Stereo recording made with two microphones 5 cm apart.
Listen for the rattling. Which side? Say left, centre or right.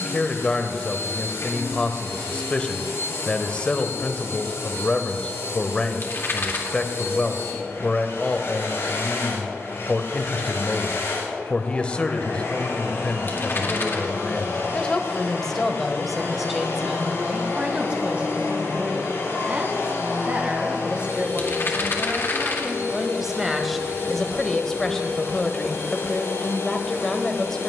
left.